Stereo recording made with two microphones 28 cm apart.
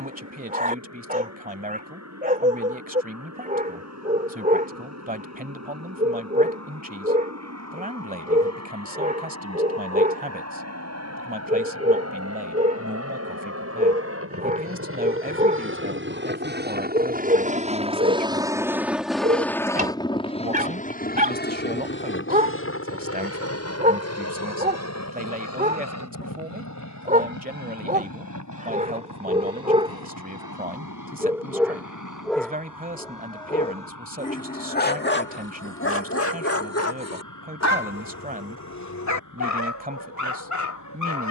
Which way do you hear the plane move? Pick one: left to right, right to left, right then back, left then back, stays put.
right to left.